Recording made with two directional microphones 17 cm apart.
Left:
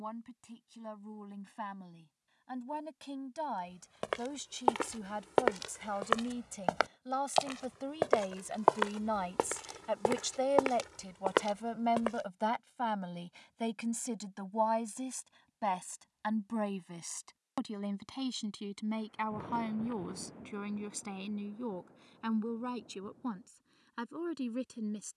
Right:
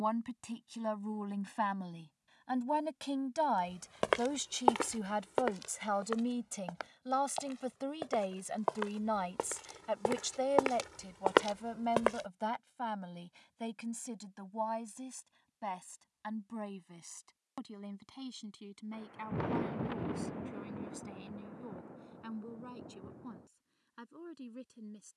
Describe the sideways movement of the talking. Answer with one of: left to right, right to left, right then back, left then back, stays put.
right to left.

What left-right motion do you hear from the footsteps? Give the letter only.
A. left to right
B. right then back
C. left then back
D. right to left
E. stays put
C.